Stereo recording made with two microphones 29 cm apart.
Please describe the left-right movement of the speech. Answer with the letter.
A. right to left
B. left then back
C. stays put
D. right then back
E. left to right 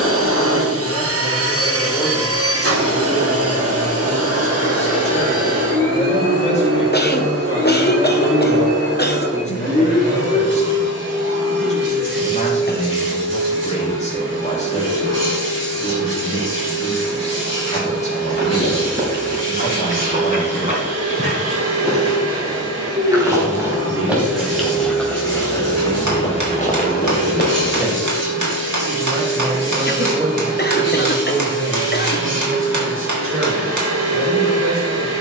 E.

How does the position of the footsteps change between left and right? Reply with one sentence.
You can hear the footsteps go from the right side to the left.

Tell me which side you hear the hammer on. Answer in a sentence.
In this clip you hear the hammer on the right.